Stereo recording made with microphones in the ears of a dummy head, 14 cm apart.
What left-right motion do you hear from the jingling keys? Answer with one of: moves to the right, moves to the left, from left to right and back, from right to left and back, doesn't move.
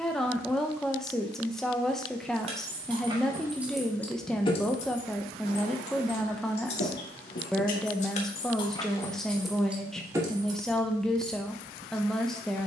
from right to left and back.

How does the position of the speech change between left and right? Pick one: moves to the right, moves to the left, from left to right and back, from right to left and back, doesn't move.
doesn't move.